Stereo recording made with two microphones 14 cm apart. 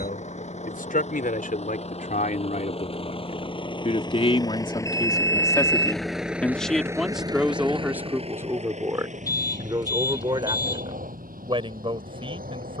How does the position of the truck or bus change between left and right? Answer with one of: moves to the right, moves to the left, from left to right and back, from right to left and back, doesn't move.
moves to the right.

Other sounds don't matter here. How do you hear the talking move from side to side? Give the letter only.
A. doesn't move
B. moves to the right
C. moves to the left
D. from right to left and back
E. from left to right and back
B.